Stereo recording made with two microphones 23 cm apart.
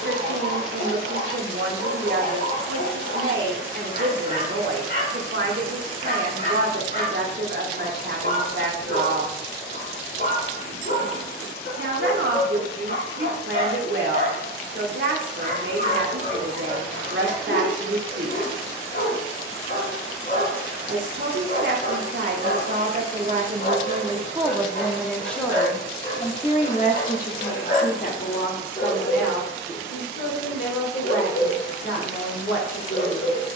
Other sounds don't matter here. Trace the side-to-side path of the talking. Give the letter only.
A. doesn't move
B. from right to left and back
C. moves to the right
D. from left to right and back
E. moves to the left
E.